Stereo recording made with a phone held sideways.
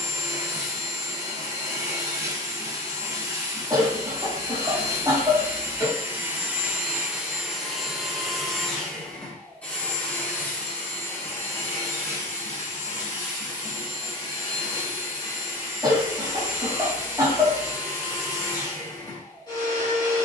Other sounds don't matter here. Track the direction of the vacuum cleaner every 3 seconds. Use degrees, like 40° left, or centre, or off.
20° right, 20° right, centre, 10° left, 30° left, 30° left, 30° left.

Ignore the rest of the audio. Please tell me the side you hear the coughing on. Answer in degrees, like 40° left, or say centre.
20° right.